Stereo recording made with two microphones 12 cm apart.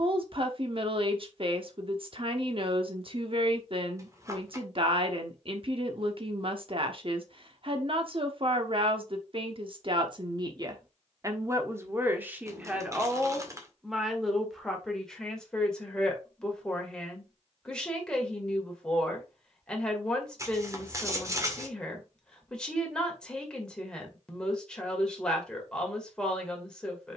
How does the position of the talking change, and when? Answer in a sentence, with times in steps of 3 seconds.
In this clip you hear the talking on the right from 0 s and in the centre from 12 s.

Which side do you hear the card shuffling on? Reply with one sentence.
In this clip you hear the card shuffling on the right.